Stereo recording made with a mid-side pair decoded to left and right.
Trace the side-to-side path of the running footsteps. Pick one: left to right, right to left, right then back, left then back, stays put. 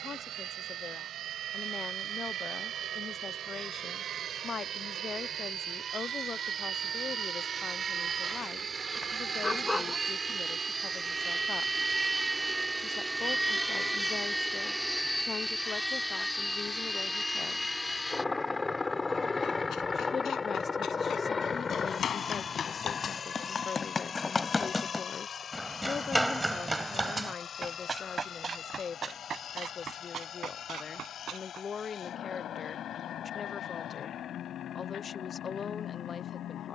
left to right.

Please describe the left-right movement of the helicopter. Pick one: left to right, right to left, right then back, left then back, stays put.
right to left.